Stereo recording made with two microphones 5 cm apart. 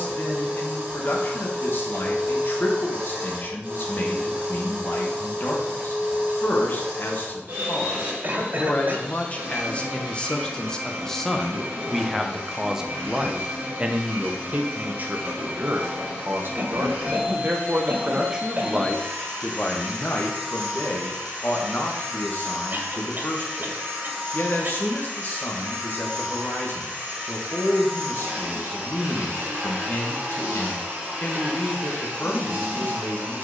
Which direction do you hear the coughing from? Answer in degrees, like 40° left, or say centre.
50° right.